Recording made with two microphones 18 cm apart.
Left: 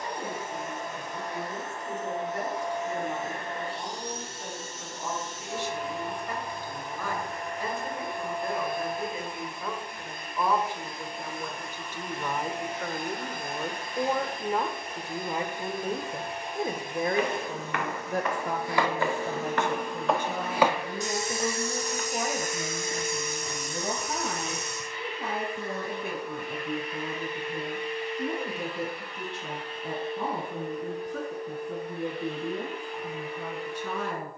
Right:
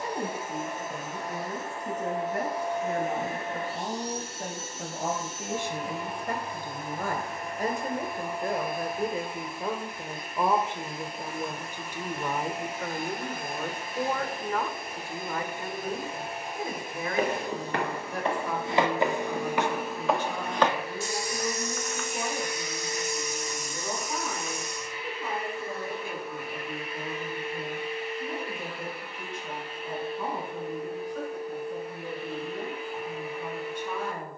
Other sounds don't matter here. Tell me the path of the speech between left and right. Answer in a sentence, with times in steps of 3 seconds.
In this clip you hear the speech on the right from 0 s, in the centre from 12 s and on the left from 15 s.